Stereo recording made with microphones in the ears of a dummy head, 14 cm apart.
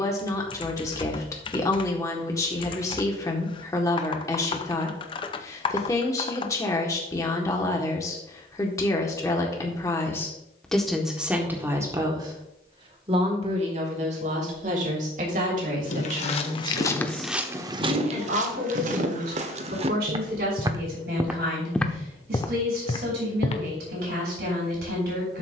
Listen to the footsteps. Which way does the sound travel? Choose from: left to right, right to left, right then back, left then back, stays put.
right then back.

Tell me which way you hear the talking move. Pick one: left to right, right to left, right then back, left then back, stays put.
left to right.